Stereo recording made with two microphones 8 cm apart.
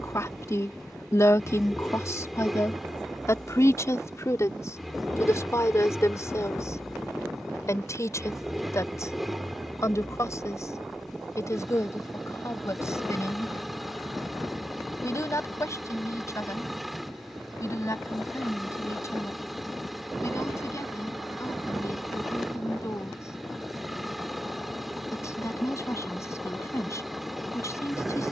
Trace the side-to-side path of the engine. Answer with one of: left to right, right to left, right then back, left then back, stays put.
stays put.